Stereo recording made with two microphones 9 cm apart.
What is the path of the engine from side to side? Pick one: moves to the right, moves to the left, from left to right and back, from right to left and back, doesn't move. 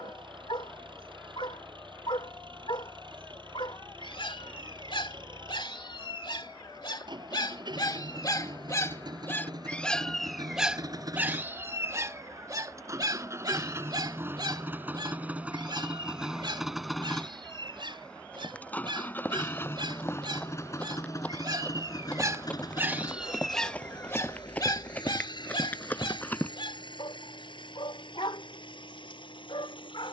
moves to the left.